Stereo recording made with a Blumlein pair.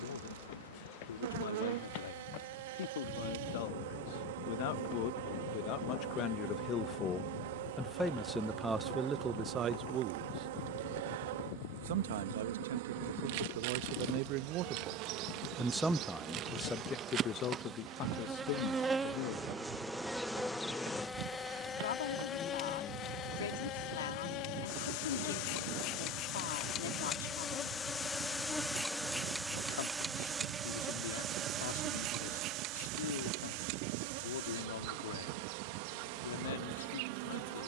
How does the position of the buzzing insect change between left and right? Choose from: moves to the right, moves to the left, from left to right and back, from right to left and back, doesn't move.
from right to left and back.